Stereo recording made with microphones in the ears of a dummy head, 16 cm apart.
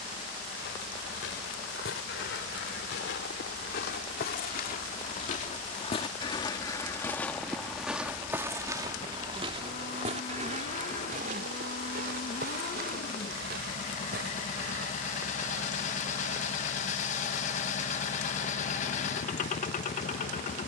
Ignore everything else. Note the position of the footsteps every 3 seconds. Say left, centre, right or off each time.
left, left, centre, right, right, off, off.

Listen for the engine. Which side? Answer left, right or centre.
left.